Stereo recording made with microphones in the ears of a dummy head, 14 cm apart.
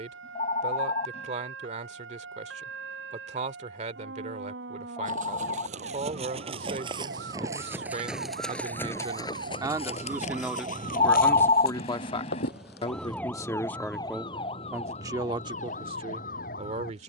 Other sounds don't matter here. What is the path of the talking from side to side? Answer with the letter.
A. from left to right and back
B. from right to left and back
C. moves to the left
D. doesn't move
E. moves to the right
B.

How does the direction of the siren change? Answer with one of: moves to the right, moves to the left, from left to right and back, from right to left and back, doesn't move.
moves to the left.